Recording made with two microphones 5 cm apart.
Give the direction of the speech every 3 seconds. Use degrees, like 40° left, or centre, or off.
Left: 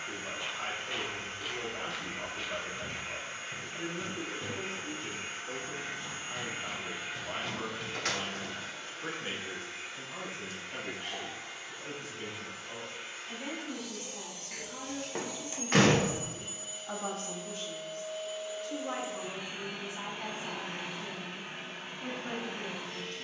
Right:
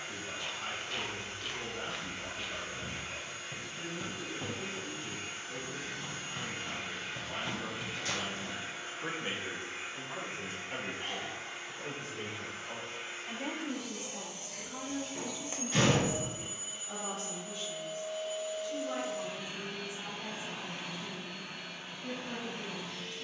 70° left, 70° left, 70° left, 40° right, 30° right, 50° left, 70° left, 70° left.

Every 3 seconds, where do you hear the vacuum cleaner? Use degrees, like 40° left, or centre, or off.
40° left, 40° left, centre, 40° right, 40° right, 20° right, 20° left, 40° left.